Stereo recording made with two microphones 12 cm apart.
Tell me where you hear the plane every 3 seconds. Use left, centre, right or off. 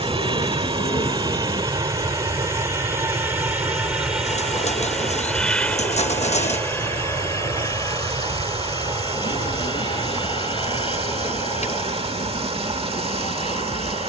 right, centre, left, left, left.